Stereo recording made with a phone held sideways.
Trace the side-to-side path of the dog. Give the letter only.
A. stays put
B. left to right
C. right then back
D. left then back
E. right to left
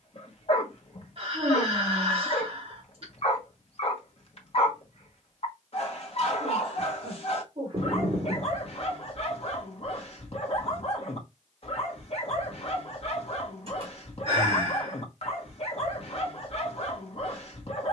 A.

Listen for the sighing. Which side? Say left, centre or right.
right.